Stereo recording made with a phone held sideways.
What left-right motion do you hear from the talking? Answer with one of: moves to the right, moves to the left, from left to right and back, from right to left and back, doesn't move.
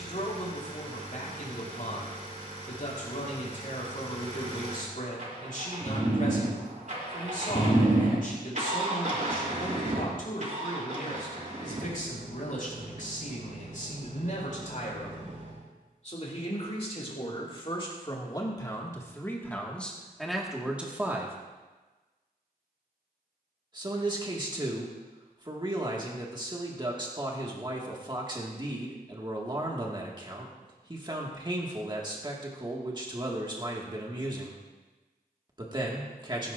moves to the right.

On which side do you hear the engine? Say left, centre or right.
right.